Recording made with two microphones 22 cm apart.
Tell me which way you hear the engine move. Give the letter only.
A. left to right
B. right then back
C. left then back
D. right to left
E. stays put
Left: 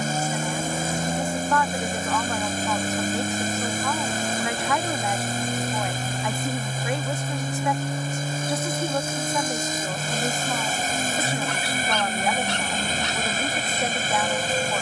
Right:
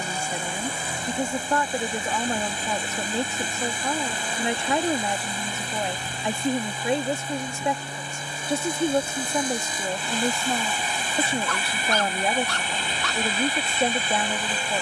E.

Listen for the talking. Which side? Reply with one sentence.
You can hear the talking on the right.